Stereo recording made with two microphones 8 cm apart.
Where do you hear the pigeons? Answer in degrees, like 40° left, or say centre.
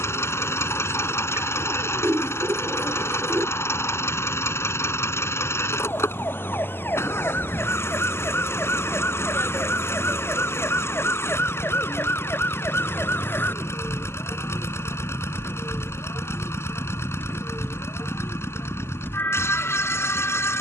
30° right.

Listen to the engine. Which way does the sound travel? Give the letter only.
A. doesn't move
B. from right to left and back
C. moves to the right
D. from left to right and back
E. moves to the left
A.